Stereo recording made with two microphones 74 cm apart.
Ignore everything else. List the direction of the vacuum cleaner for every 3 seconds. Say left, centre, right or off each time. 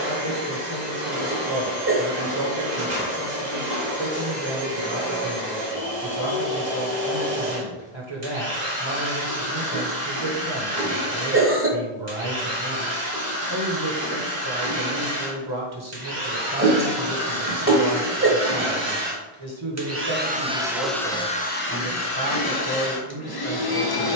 right, right, right, right, right, right, right, left.